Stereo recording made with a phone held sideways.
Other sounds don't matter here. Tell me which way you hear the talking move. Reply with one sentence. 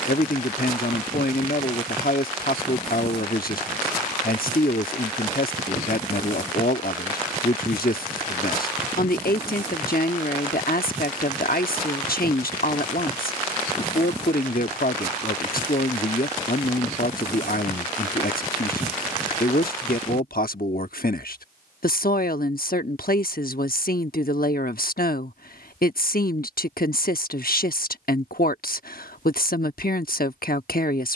You can hear the talking stay in one place.